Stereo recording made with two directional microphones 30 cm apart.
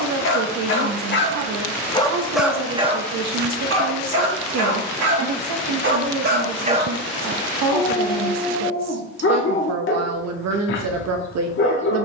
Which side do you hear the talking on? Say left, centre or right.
right.